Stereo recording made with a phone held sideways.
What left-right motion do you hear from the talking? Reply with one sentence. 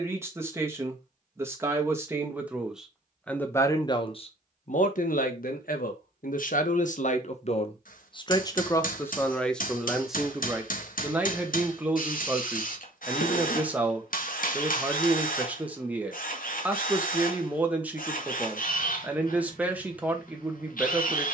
You can hear the talking go left and come back.